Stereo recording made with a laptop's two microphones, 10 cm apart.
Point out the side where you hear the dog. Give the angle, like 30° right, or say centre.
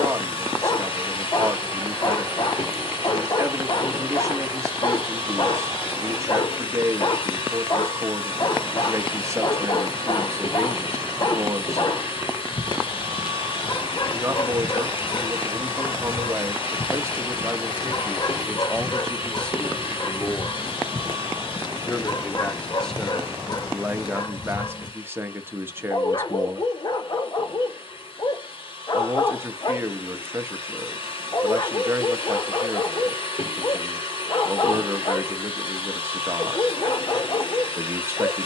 40° left.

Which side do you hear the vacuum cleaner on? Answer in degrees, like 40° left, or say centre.
60° left.